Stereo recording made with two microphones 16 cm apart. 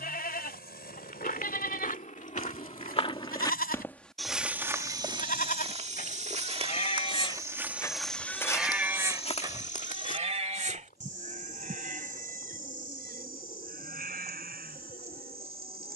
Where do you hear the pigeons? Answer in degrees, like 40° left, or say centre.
40° right.